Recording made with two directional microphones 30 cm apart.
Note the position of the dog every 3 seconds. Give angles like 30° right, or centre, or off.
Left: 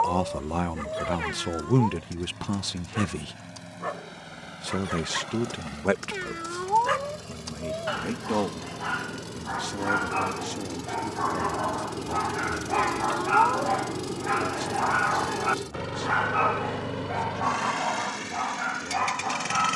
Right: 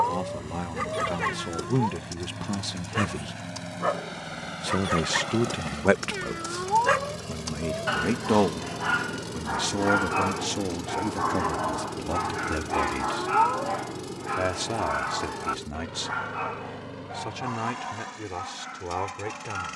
50° right, 40° right, 30° right, 10° right, 20° left, 40° left, 60° left.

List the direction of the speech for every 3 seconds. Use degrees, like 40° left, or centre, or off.
20° left, 20° right, 40° right, 50° right, 60° right, 60° right, 70° right.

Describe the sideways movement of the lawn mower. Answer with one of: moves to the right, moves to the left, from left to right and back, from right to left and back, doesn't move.
moves to the left.